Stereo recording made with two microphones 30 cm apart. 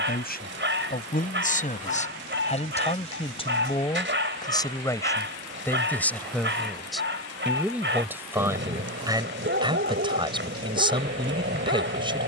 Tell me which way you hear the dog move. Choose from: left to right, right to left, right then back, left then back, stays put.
stays put.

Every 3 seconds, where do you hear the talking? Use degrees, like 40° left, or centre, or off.
30° left, 10° left, centre, 10° right.